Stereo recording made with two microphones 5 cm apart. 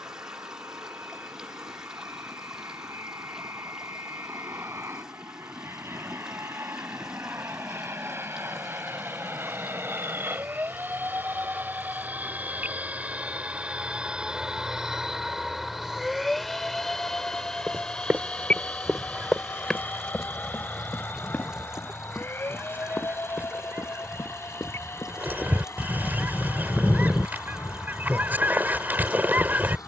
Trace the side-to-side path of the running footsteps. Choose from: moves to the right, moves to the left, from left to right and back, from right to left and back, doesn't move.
moves to the left.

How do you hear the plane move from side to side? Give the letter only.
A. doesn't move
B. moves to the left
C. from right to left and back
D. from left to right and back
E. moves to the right
B.